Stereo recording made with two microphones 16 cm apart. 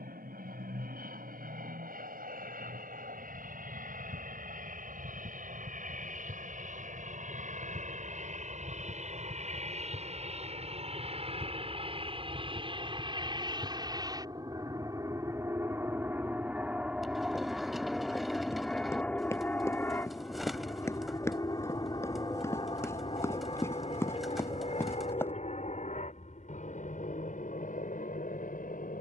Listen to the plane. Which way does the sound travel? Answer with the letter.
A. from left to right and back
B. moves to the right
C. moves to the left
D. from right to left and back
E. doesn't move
C.